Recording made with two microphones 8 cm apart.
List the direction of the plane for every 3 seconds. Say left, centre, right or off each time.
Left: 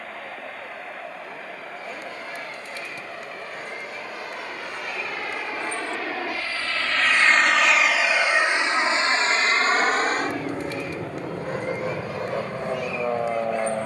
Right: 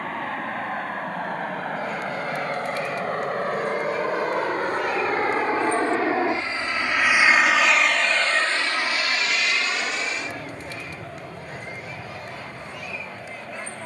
right, right, centre, left, left.